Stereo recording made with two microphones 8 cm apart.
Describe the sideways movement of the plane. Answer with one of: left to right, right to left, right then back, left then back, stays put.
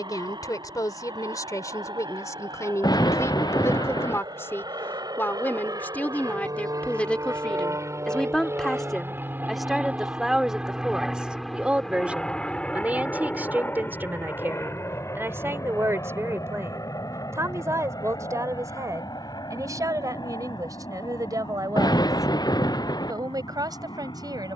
right to left.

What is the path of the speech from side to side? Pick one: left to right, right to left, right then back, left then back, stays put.
left to right.